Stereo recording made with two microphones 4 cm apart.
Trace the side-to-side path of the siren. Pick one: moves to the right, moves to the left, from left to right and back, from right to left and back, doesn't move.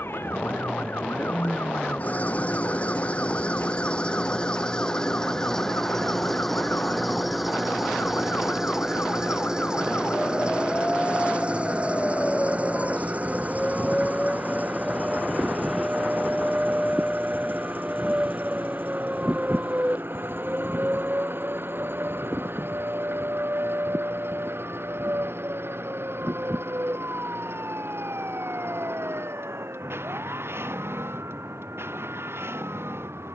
moves to the right.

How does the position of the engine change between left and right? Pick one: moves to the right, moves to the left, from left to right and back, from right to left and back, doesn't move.
moves to the right.